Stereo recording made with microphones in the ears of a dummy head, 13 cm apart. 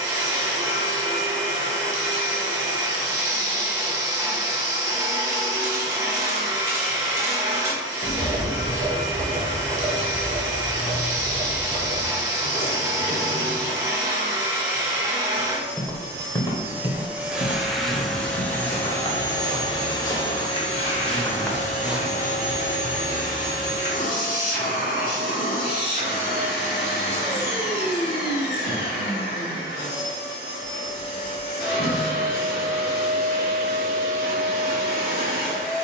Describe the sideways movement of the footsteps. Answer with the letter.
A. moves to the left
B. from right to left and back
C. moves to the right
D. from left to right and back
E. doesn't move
B.